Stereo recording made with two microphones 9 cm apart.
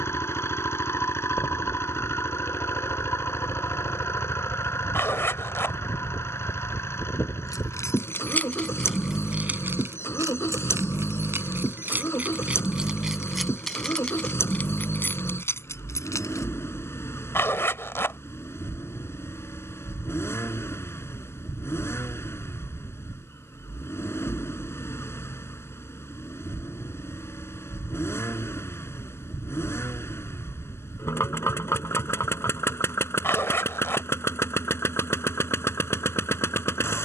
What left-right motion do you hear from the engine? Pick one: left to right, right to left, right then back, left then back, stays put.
stays put.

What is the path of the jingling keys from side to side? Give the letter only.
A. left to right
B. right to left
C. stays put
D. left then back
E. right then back
E.